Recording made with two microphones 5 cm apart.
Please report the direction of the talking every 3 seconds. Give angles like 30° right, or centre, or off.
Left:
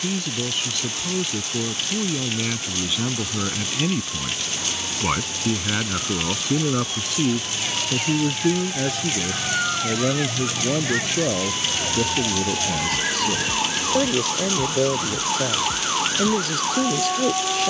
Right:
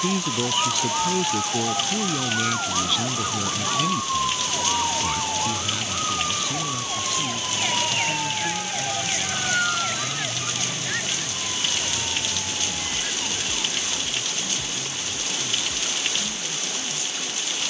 centre, 30° left, 60° left, 70° left, 80° left, 80° left.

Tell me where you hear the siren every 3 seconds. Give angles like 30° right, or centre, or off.
60° right, 50° right, 30° right, 10° left, 50° left, 60° left.